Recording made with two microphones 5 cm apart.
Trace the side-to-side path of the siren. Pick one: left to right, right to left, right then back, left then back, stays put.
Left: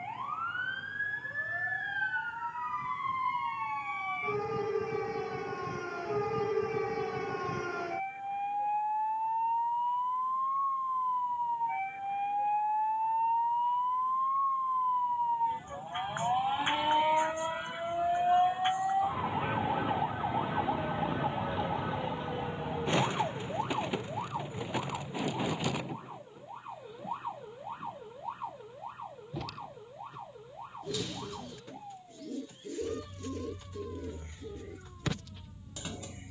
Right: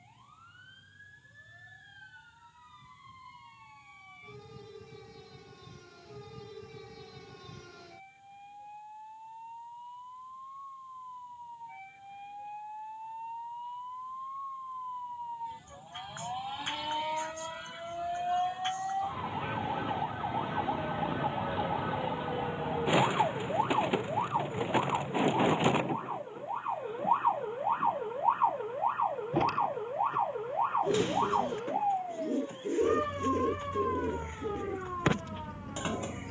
left to right.